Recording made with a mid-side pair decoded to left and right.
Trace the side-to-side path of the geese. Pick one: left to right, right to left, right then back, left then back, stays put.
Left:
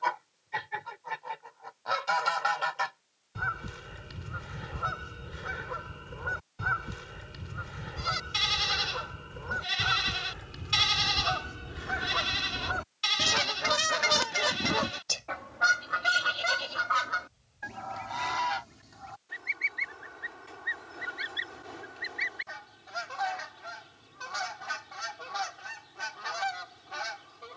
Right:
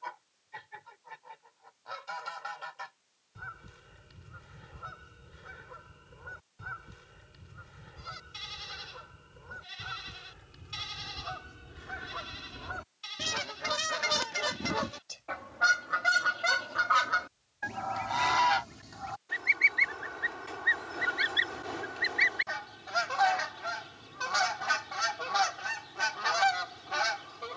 left to right.